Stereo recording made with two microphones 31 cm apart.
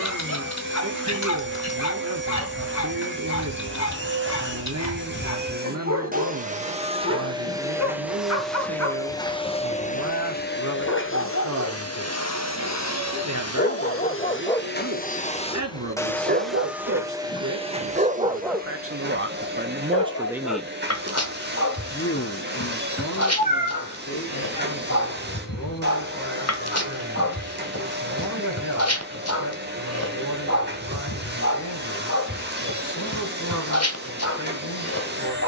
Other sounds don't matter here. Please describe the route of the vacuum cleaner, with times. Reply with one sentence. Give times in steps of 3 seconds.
In this clip you hear the vacuum cleaner on the right from 0 s, in the centre from 6 s, on the left from 9 s, in the centre from 15 s and on the right from 18 s.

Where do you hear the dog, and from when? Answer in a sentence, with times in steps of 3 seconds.
You can hear the dog on the left from 0 s, on the right from 15 s and on the left from 18 s.